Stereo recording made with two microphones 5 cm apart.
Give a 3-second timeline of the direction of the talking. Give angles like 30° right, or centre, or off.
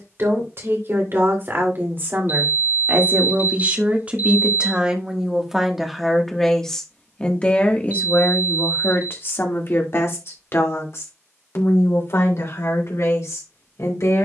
50° right, 20° right, 20° left, 60° left, 70° left.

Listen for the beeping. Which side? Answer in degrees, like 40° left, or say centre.
40° right.